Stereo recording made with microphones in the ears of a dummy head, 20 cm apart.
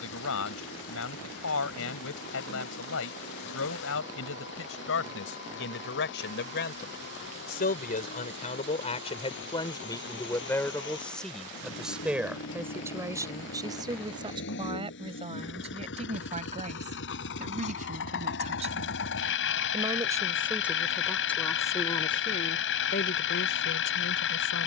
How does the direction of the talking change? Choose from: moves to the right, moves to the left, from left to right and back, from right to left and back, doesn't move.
from left to right and back.